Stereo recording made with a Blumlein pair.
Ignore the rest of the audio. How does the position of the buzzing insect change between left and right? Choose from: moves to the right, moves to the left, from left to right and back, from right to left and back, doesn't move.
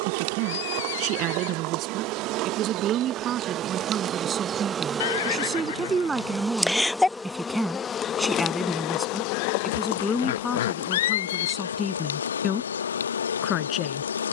moves to the left.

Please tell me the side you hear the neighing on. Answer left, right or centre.
left.